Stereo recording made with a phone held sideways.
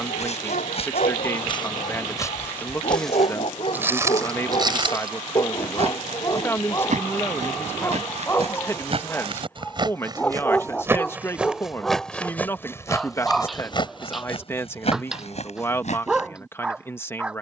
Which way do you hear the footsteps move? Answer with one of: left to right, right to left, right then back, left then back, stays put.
right then back.